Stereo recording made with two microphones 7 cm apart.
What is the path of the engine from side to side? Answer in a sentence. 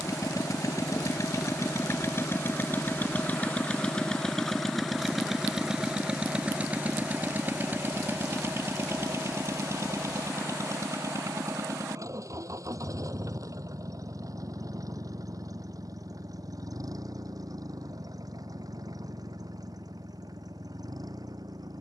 You can hear the engine move to the right.